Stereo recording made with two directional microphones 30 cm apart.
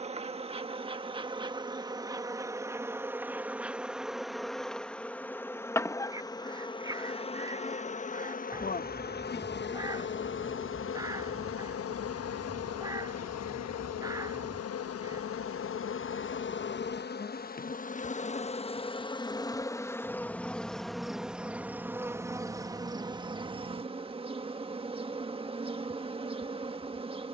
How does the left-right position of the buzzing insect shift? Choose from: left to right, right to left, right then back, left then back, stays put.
left then back.